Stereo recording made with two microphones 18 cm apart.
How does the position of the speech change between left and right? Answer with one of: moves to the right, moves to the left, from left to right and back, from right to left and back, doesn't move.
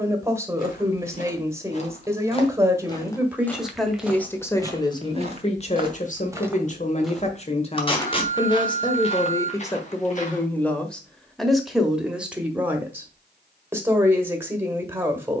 from right to left and back.